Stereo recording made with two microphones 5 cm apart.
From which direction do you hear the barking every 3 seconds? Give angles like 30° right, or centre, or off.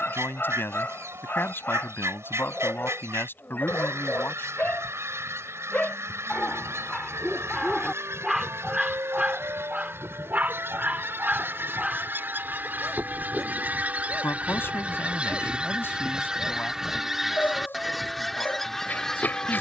40° left, 30° left, centre, 30° right, 10° left, 40° left, 40° left.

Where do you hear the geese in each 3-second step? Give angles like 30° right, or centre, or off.
70° right, 70° right, 70° right, 60° right, 40° right, 10° right, 10° left.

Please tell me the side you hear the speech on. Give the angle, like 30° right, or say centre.
50° left.